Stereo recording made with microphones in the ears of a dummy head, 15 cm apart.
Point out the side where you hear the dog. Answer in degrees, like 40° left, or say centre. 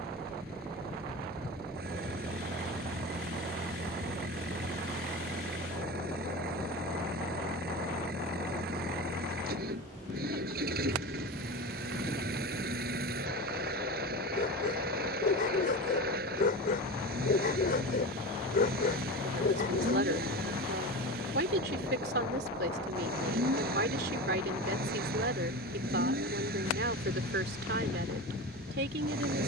60° left.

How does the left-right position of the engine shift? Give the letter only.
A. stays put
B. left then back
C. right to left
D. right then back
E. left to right
A.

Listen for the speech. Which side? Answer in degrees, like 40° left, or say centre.
60° right.